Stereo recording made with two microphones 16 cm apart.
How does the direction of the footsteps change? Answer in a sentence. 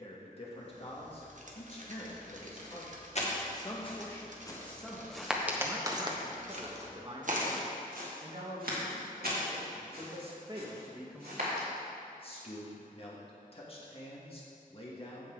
You can hear the footsteps go from the left side to the right.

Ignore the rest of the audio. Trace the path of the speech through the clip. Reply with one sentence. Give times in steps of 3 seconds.
You can hear the speech on the left from 0 s, in the centre from 3 s, on the right from 6 s and on the left from 12 s.